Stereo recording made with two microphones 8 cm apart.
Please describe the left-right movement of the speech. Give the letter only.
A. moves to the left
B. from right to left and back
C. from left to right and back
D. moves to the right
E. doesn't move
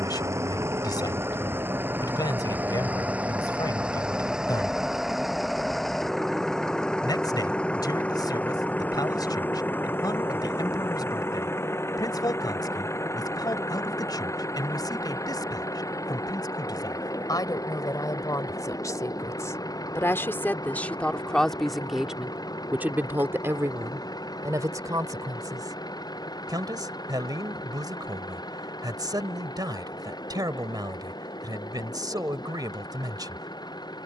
D.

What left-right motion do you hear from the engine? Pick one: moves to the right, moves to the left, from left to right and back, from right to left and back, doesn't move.
moves to the left.